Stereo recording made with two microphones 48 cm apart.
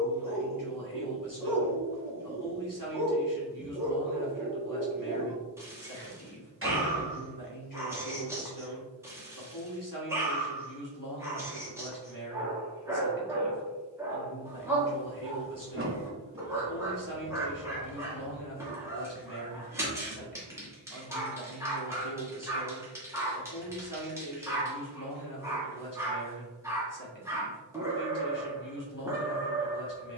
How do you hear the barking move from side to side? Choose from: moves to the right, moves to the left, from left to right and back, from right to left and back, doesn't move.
doesn't move.